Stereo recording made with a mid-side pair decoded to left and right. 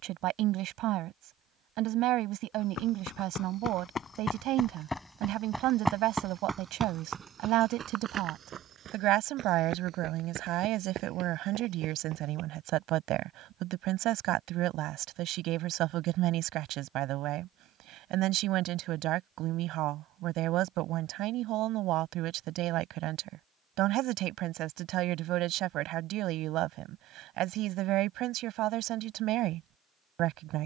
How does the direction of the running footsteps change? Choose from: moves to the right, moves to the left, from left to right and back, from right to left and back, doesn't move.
moves to the right.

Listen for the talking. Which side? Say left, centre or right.
right.